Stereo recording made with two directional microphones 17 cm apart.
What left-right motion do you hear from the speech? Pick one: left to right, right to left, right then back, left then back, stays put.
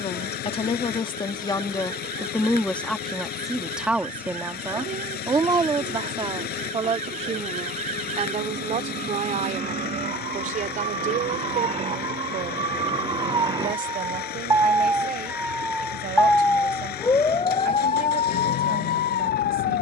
left to right.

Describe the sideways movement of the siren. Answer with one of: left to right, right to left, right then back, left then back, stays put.
right to left.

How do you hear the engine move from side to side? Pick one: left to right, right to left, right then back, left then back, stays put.
stays put.